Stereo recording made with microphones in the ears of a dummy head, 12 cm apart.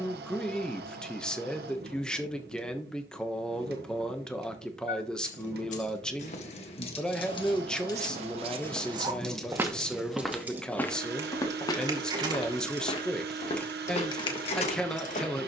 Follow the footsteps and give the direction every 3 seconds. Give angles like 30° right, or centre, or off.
off, off, 40° right, 10° left, 40° left.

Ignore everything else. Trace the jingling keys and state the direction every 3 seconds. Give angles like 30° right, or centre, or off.
off, 60° left, 30° left, 10° right, 10° left.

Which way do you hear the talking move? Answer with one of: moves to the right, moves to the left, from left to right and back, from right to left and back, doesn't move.
doesn't move.